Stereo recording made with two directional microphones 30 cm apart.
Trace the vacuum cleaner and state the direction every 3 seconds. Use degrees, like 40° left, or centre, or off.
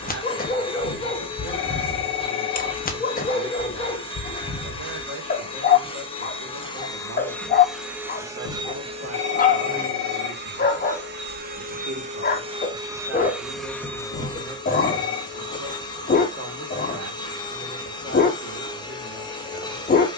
20° left, 20° left, centre, 30° right, centre, 10° left, 10° left.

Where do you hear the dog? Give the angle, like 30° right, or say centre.
30° left.